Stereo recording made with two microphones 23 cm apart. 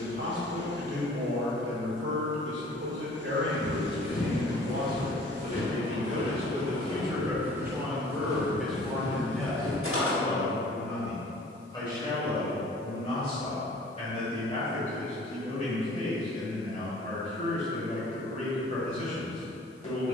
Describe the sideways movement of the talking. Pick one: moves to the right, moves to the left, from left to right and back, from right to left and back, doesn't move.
moves to the left.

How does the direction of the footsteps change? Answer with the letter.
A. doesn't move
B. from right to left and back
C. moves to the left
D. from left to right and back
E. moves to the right
E.